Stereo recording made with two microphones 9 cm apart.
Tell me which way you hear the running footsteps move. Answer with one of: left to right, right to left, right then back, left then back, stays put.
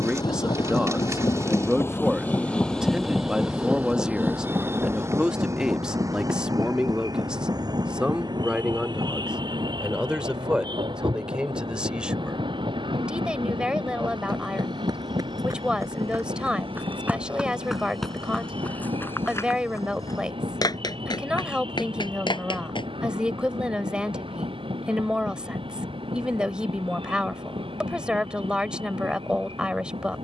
right to left.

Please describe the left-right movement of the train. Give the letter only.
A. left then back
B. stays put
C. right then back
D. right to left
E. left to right
E.